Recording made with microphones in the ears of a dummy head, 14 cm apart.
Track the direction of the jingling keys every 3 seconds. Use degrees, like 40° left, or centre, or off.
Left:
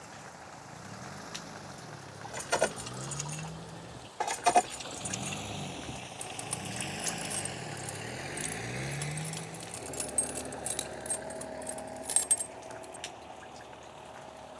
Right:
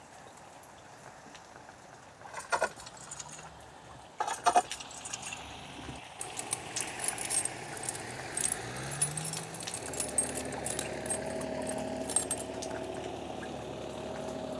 30° left, 10° left, 20° right, centre, 20° left.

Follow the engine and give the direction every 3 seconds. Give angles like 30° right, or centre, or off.
70° left, 60° left, 40° left, 10° right, 50° right.